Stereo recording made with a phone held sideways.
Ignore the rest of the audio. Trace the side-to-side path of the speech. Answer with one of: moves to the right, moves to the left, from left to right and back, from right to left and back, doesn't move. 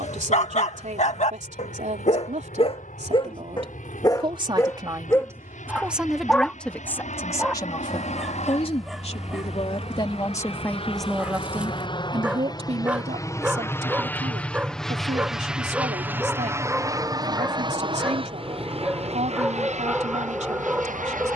from right to left and back.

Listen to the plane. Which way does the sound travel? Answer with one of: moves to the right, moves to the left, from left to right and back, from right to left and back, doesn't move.
moves to the right.